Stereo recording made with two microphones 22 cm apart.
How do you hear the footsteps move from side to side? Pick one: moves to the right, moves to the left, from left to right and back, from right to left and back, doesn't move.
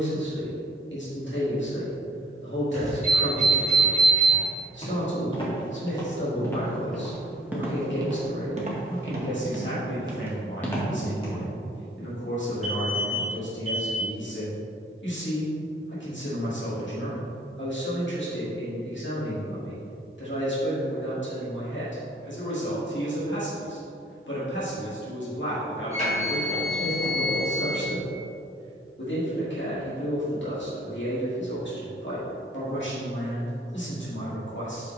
from left to right and back.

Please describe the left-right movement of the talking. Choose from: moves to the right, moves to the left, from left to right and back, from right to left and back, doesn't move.
doesn't move.